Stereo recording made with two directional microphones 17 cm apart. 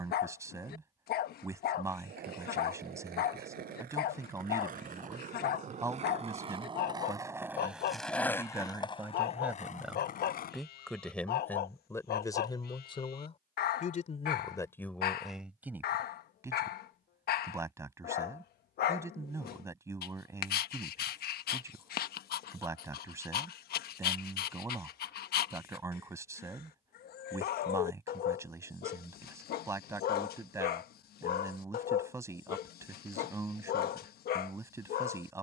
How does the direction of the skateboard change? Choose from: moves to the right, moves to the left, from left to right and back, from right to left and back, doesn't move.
moves to the left.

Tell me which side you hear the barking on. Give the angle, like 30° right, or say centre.
60° left.